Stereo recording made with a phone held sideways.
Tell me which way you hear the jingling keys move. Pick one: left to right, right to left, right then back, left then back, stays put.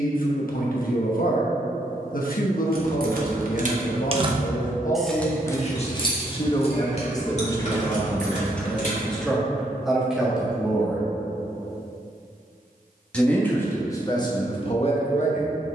right to left.